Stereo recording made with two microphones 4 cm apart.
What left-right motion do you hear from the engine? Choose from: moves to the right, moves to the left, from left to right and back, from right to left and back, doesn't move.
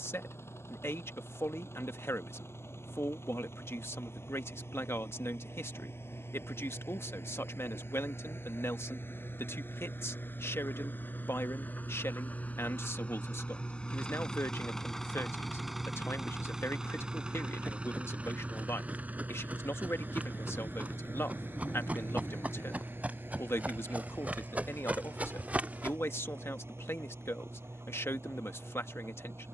moves to the right.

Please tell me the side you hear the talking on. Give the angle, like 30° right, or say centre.
70° left.